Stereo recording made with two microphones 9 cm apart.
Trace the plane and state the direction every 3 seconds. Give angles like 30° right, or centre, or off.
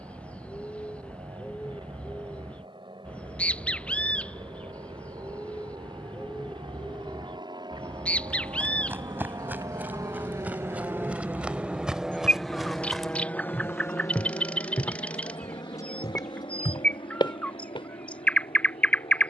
80° right, 70° right, 60° right, 30° right, 20° left, 60° left, 70° left.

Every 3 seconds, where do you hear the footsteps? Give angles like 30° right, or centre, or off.
off, off, 20° right, 20° right, 10° left, 50° left, off.